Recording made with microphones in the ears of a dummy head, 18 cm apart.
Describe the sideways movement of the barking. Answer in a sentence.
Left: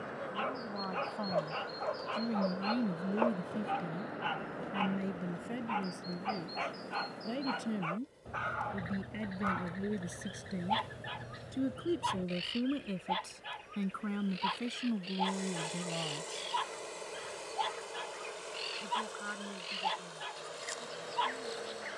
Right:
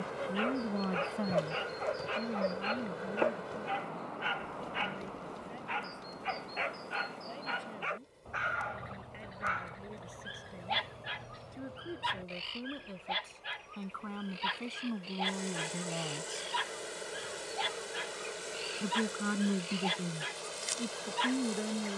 In this clip you hear the barking stay in one place.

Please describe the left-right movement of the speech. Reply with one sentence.
In this clip you hear the speech go left and come back.